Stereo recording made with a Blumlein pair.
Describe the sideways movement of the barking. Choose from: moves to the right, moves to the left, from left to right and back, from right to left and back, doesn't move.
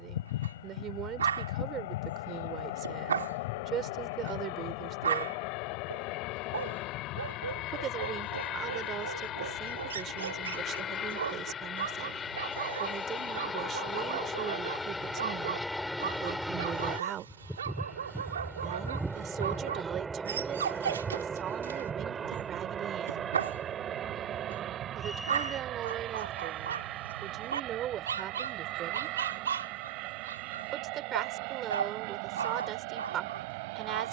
doesn't move.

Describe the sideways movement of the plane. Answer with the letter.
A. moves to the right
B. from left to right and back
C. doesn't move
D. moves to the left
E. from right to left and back
A.